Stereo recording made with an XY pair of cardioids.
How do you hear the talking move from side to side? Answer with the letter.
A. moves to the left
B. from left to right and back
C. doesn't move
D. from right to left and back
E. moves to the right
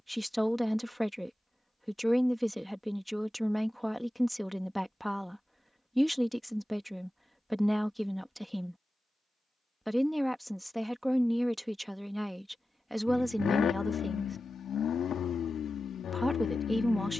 C.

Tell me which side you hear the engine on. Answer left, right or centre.
left.